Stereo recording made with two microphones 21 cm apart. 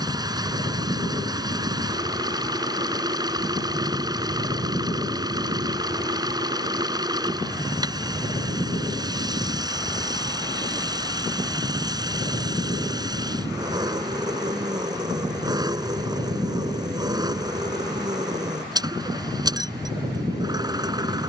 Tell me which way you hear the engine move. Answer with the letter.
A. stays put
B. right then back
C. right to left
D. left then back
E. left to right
A.